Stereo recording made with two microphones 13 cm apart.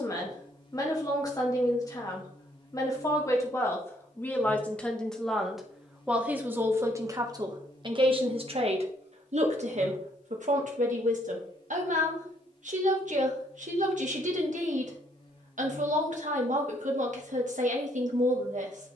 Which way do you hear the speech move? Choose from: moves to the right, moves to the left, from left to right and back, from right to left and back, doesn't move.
moves to the right.